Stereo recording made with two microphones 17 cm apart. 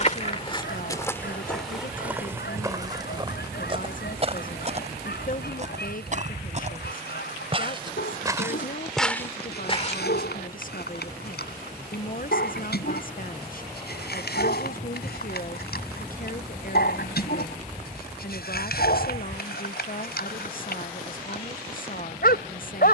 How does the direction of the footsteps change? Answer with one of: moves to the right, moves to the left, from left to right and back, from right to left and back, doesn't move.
from left to right and back.